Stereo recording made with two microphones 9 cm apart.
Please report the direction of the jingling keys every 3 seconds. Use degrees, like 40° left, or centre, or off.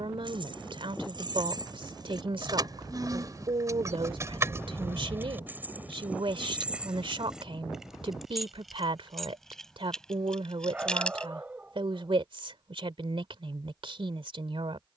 50° right, 30° right, 10° right, 10° left, off.